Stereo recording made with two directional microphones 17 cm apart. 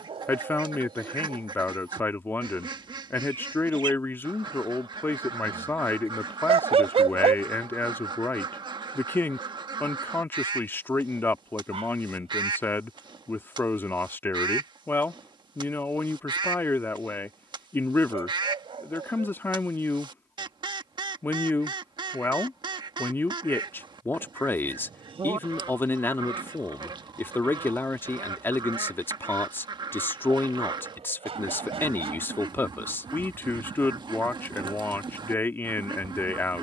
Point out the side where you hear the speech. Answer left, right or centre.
centre.